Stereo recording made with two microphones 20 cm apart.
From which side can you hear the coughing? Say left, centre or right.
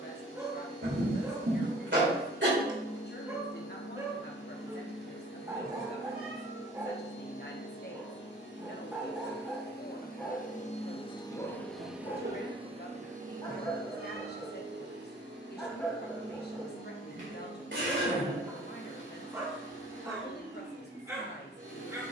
right.